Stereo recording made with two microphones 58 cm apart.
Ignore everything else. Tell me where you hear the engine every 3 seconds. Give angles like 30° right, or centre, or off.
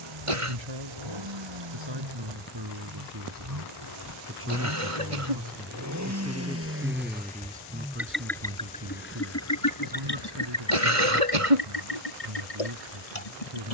50° right, 40° right, 10° right, 40° left, 80° left.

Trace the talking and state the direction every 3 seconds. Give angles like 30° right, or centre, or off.
50° right, 20° right, 10° right, 50° right, 50° right.